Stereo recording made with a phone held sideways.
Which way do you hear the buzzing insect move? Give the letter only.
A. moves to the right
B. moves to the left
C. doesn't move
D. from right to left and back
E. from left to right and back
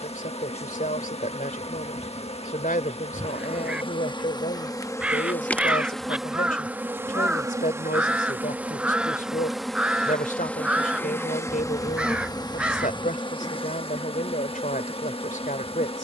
E.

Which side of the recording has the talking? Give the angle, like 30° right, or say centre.
80° left.